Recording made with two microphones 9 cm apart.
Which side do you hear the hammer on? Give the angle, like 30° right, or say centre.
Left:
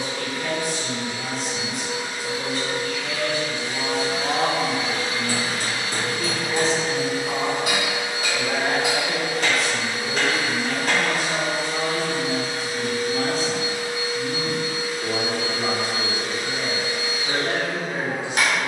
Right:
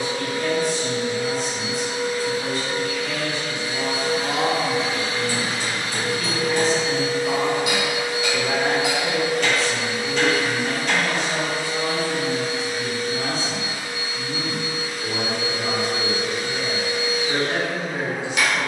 40° left.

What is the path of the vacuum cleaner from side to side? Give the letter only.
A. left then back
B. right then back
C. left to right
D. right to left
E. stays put
D.